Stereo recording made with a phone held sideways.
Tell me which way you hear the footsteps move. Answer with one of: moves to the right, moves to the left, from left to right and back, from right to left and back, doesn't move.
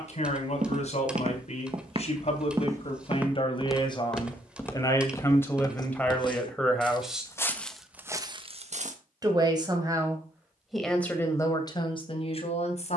from right to left and back.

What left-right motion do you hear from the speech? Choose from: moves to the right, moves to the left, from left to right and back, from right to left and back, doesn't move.
from left to right and back.